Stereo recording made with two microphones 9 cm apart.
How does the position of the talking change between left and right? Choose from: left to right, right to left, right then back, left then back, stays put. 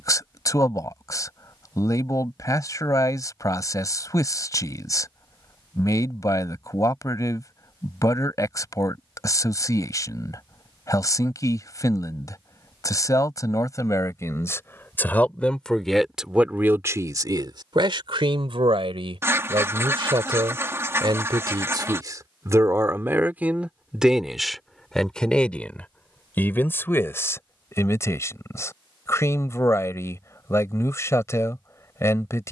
right then back.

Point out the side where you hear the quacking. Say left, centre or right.
right.